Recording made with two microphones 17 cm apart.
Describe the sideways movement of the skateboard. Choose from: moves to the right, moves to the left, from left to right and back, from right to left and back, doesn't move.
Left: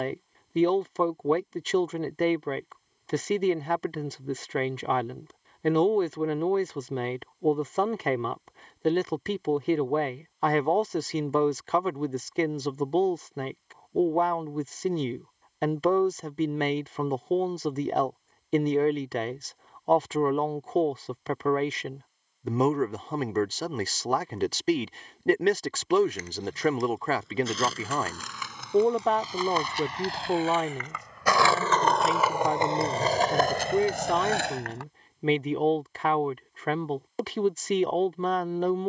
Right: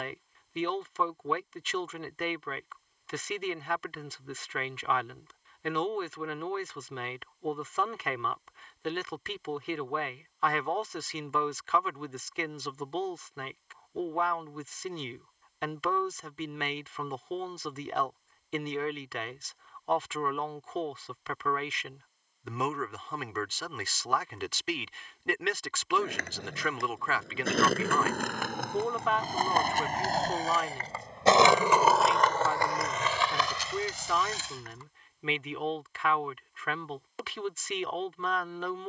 moves to the left.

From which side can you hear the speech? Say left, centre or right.
left.